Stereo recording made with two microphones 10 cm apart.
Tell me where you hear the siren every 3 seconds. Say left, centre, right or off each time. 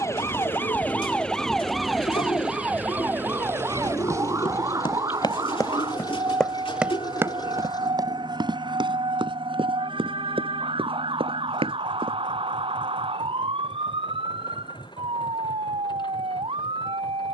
centre, right, right, right, right, right.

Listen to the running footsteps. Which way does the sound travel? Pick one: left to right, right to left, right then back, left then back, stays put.
left to right.